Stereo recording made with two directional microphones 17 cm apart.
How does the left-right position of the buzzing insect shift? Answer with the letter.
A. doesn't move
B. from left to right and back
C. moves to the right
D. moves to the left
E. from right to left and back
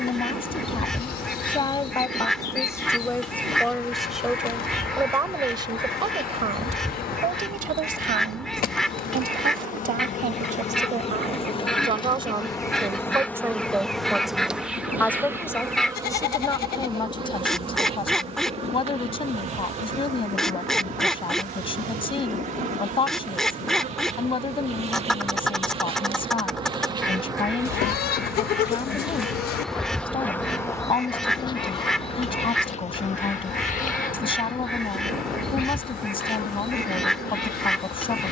B.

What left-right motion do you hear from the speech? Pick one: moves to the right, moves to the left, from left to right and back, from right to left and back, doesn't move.
from left to right and back.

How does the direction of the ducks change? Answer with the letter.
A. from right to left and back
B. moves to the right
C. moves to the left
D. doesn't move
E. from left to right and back
D.